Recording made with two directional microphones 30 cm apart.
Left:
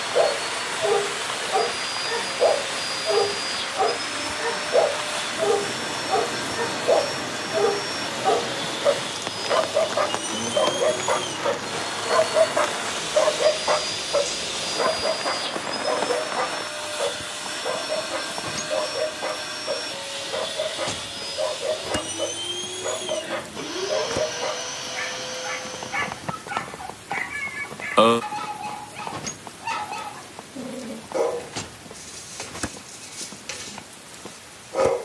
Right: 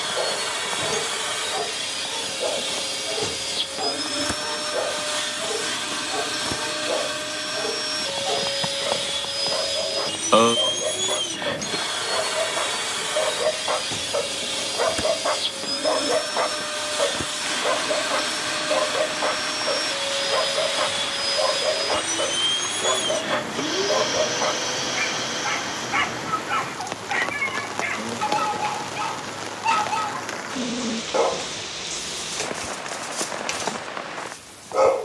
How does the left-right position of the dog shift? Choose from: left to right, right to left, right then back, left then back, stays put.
left to right.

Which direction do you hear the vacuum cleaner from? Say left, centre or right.
right.